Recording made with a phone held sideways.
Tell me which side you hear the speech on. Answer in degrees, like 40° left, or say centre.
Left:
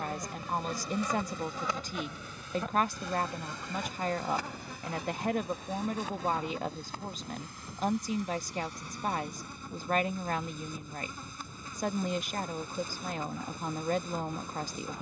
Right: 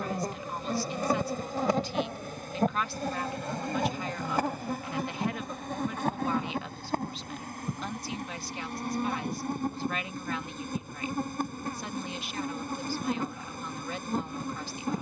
40° left.